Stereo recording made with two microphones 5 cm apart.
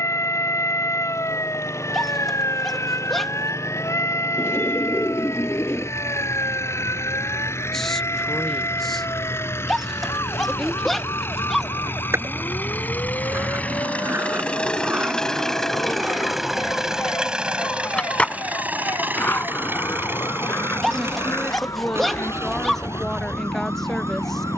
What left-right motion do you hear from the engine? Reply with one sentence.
In this clip you hear the engine travel towards the right.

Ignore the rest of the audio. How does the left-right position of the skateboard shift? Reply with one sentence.
In this clip you hear the skateboard move from right to left.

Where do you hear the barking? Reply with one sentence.
In this clip you hear the barking in the centre.